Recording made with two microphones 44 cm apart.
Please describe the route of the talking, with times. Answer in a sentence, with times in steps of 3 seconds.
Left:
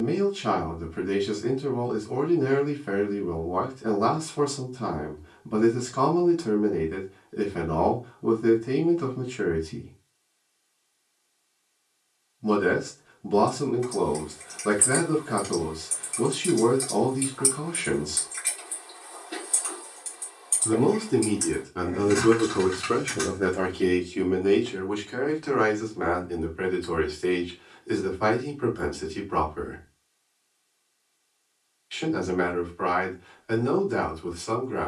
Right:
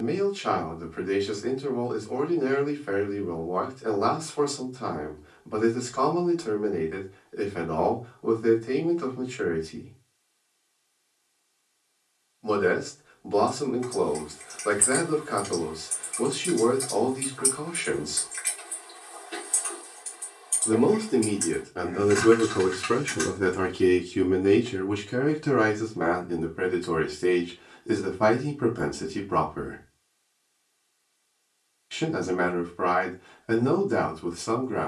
In this clip you hear the talking on the left from 0 s, in the centre from 21 s and on the right from 24 s.